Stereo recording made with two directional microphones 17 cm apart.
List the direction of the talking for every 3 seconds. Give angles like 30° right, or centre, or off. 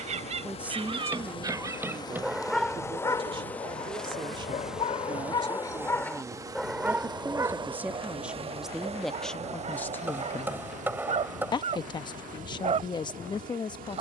20° right, 30° right, 10° right, 10° left, 30° left.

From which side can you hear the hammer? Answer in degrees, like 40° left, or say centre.
10° right.